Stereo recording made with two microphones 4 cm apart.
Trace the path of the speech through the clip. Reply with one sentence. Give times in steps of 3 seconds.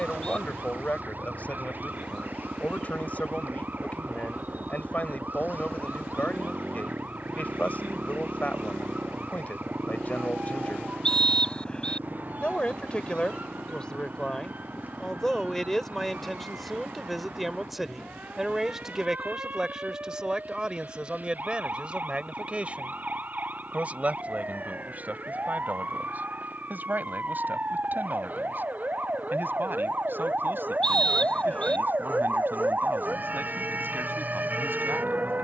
In this clip you hear the speech on the left from 0 s, in the centre from 15 s and on the right from 21 s.